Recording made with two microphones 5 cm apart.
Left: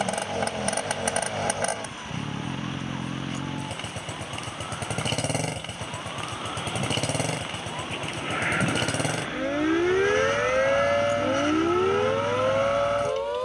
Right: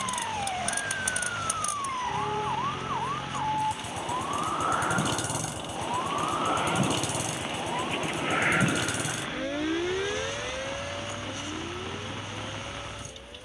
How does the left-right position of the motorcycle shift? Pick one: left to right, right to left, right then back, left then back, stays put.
stays put.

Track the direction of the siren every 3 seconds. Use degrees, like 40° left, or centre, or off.
50° right, 50° right, 20° right, 40° left, 80° left.